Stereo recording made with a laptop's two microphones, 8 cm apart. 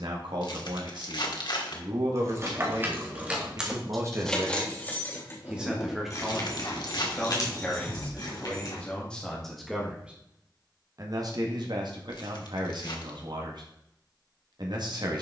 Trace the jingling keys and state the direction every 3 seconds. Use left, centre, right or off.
right, centre, left, off, off.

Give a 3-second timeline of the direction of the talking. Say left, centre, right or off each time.
right, right, centre, right, right.